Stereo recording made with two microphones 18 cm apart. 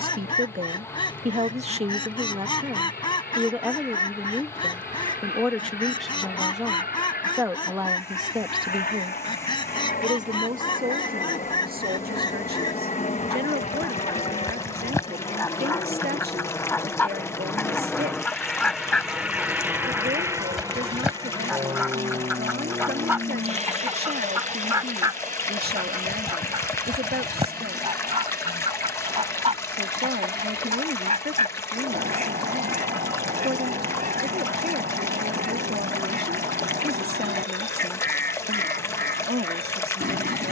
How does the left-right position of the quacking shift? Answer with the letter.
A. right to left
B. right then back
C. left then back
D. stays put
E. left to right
E.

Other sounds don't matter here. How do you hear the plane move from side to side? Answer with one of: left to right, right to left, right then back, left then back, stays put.
left to right.